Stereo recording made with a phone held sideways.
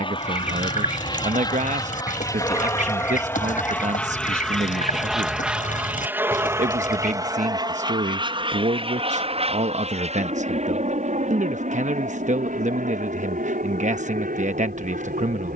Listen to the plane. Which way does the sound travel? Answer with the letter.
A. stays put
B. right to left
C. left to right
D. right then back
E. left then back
C.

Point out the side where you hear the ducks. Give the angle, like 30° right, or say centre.
60° left.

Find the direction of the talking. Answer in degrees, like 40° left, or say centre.
60° right.